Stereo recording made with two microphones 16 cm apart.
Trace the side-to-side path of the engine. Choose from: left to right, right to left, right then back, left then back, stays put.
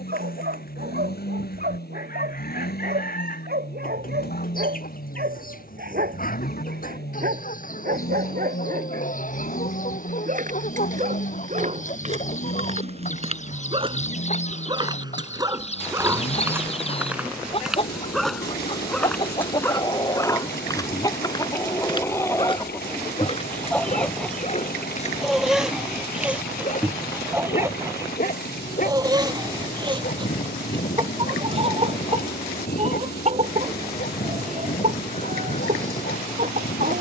stays put.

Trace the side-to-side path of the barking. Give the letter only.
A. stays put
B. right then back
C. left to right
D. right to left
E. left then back
D.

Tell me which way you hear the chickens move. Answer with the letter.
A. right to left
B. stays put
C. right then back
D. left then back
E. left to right
E.